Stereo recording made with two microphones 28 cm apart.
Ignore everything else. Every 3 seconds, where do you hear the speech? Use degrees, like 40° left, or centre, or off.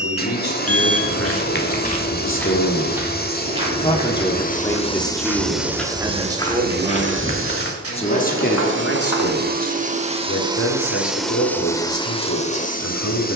50° left, 10° left, 10° left, 60° left, 70° left.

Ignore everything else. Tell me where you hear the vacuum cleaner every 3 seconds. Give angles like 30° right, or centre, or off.
30° left, 20° left, 40° right, 10° right, 30° left.